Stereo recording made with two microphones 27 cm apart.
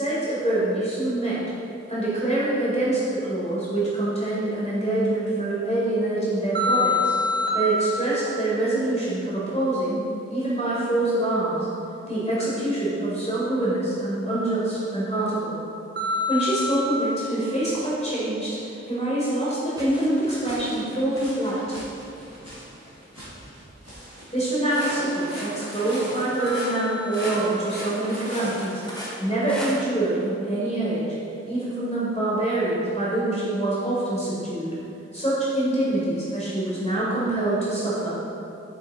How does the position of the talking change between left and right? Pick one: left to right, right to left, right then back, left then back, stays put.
stays put.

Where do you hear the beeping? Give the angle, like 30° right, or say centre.
40° right.